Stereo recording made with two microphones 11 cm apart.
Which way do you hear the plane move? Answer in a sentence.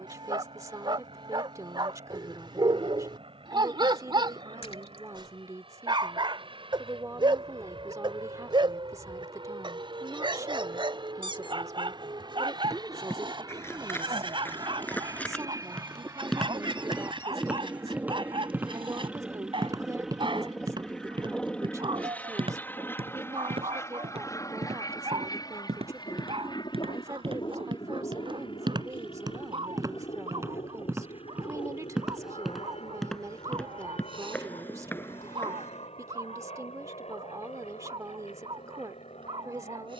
You can hear the plane travel towards the left.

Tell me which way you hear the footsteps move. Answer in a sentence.
You can hear the footsteps go right and come back.